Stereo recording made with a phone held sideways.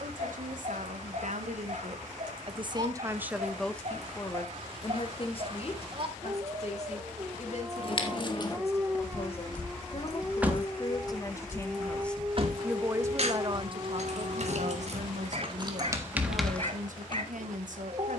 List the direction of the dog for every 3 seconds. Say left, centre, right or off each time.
right, right, right, centre, right, right.